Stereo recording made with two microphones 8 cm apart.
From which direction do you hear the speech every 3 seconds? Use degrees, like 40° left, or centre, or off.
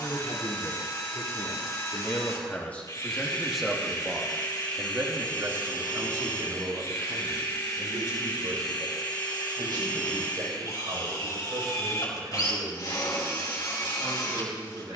40° left, 20° right, 60° right, 80° right, 80° right.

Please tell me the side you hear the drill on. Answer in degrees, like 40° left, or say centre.
50° left.